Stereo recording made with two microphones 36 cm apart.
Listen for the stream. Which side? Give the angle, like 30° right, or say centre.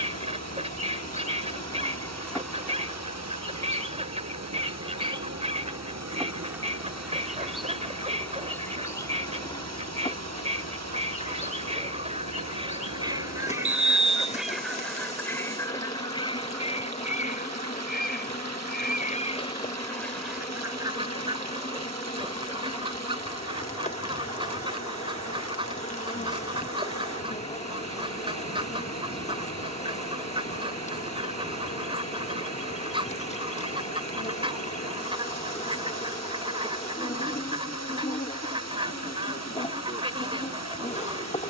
50° right.